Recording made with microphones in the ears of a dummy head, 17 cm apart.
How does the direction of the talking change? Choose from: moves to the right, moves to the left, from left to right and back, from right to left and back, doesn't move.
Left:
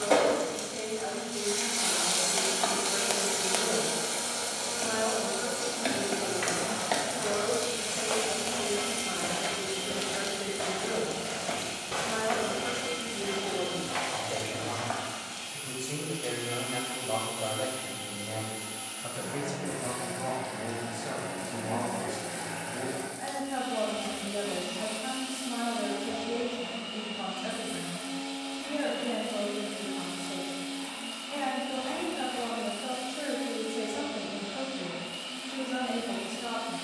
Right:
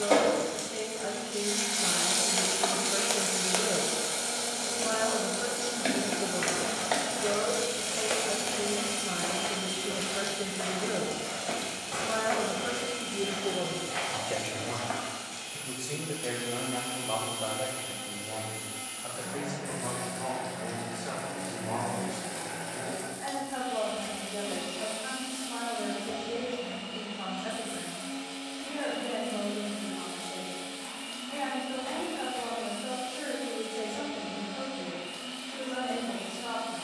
moves to the left.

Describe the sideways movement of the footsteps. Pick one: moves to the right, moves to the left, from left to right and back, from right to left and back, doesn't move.
moves to the left.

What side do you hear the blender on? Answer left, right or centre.
left.